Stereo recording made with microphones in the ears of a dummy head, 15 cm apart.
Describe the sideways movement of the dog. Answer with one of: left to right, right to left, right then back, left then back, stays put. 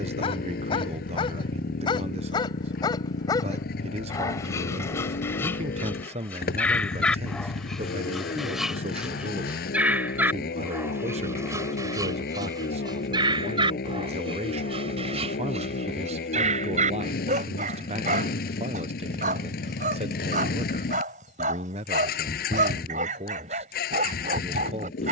left to right.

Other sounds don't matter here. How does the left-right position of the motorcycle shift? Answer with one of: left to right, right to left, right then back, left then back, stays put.
stays put.